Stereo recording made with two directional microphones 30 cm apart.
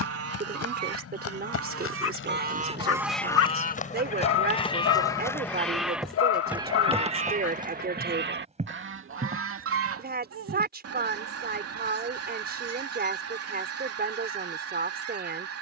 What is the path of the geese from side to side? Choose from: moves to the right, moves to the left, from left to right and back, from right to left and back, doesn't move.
from right to left and back.